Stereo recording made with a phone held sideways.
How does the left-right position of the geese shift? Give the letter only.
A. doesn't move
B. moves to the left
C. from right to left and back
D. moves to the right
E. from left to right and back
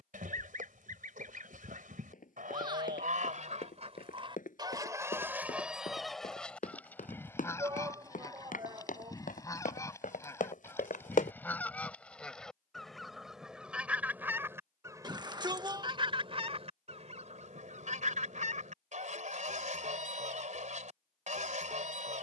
C.